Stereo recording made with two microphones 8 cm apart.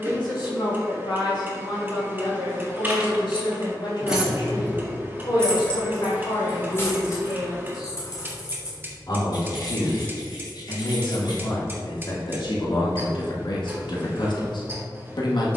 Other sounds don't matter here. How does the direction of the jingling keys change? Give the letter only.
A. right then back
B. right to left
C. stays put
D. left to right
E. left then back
B.